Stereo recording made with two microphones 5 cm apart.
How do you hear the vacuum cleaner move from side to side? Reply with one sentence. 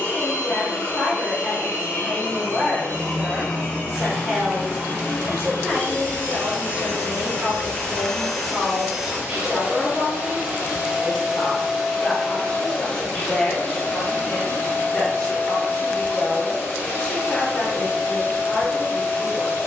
In this clip you hear the vacuum cleaner go right and come back.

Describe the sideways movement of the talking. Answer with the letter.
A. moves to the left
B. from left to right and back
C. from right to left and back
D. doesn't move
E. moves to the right
B.